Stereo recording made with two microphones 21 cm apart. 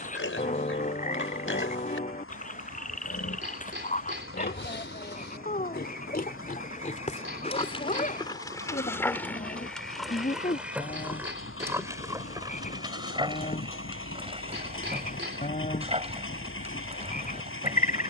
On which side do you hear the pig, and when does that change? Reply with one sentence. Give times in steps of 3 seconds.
You can hear the pig on the left from 0 s, in the centre from 9 s and on the right from 12 s.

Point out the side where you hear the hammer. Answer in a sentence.
In this clip you hear the hammer on the right.